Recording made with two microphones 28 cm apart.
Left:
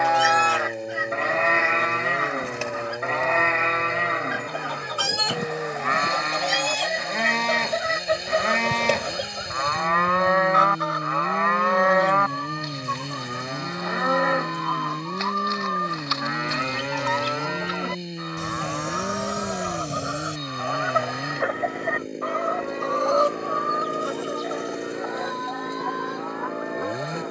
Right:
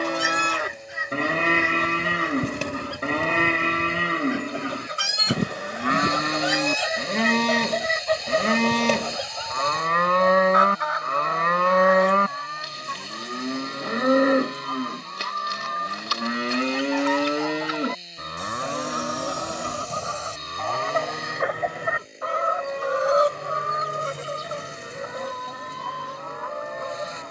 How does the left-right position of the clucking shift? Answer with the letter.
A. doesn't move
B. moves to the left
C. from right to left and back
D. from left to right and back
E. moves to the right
C.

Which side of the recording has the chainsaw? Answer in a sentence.
You can hear the chainsaw on the left.